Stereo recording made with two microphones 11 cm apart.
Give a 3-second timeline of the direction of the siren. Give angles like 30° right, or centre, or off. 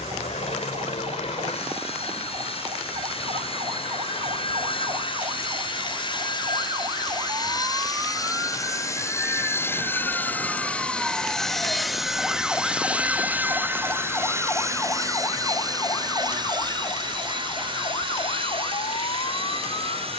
50° right, 40° right, 30° right, 10° right, 10° left, 30° left, 50° left.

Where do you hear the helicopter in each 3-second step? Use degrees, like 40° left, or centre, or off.
60° left, 50° left, 40° left, 10° left, 10° right, 40° right, 50° right.